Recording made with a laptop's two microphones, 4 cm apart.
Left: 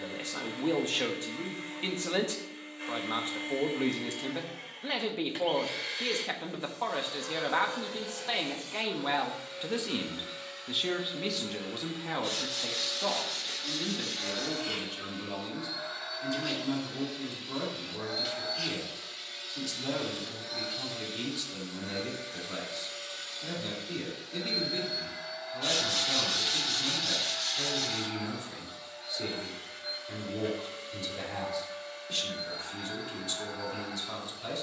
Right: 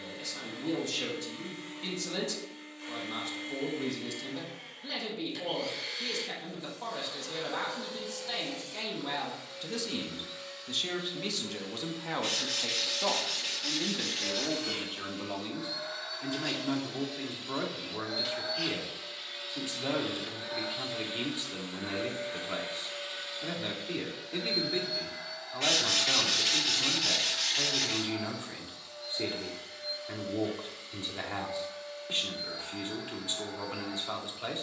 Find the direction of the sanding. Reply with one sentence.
In this clip you hear the sanding on the right.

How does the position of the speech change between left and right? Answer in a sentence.
In this clip you hear the speech move from left to right.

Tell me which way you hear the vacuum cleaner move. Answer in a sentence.
You can hear the vacuum cleaner go right and come back.